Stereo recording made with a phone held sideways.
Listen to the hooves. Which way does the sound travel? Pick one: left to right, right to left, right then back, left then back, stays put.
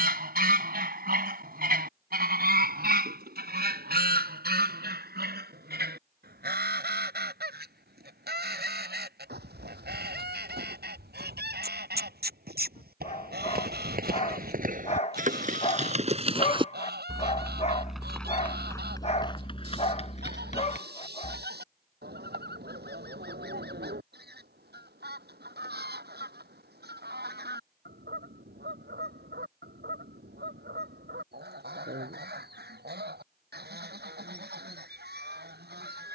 right to left.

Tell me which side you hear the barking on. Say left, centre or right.
left.